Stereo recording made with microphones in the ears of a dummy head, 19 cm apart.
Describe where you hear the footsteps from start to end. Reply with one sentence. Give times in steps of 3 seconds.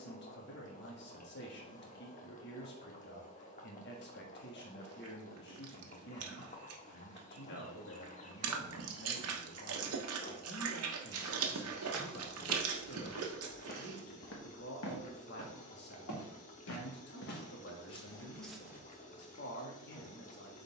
In this clip you hear the footsteps not at all from 0 s, in the centre from 9 s, on the left from 12 s and in the centre from 18 s.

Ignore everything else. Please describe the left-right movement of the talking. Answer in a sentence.
You can hear the talking stay in one place.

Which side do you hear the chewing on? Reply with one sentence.
In this clip you hear the chewing on the right.